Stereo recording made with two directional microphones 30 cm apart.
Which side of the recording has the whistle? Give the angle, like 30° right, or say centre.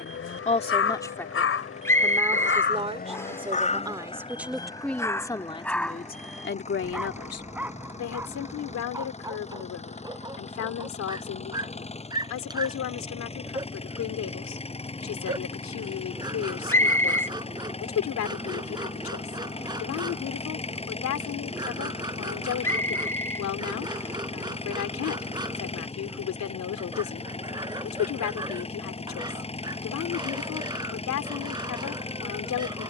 10° left.